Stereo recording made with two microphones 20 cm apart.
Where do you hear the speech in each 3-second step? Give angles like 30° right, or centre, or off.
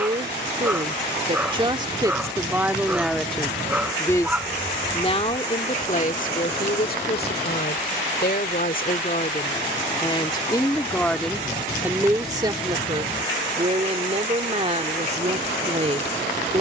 20° right, 20° left, 50° left, 20° left, 30° right, 30° right.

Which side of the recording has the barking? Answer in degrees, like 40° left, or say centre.
10° right.